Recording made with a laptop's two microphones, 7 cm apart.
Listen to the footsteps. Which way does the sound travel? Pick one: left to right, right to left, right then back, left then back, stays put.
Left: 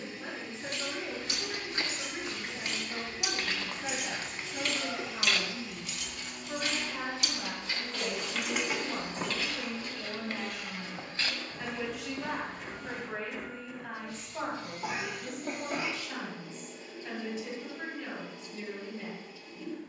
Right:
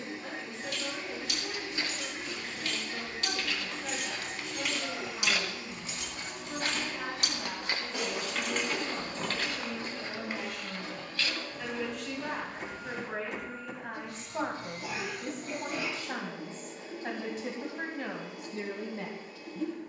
right then back.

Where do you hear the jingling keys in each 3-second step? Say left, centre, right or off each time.
left, centre, right, left, off, off, off.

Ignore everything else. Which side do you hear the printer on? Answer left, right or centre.
right.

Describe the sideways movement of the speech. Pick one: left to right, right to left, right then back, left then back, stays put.
left to right.